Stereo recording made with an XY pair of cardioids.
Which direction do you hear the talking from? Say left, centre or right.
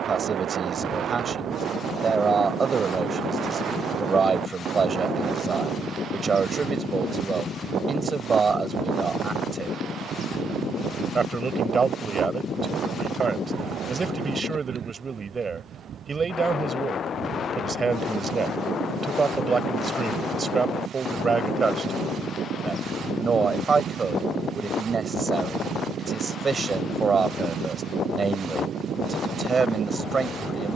right.